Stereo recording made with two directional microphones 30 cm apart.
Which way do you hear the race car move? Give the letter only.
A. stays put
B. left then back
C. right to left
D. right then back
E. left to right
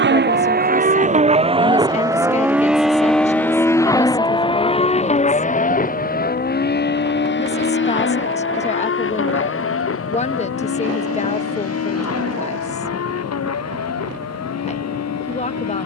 C.